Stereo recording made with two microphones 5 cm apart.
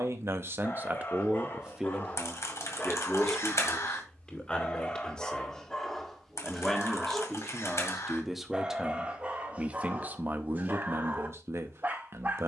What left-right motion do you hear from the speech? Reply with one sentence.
In this clip you hear the speech move from right to left and back again.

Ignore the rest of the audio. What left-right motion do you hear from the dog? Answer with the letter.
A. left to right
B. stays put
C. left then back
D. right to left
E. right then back
A.